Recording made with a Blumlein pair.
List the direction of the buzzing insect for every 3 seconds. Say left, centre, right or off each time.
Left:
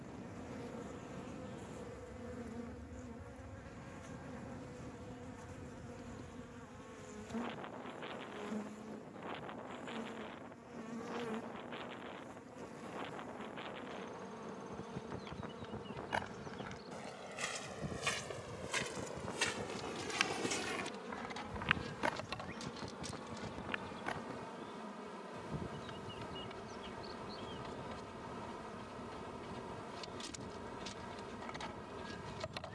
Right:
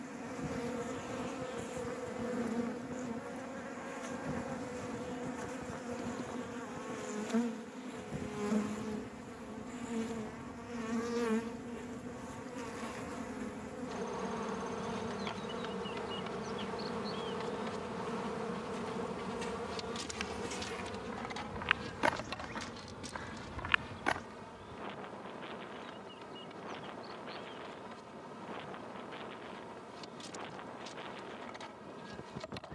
right, right, right, right, right, right, right, centre, centre, centre, centre.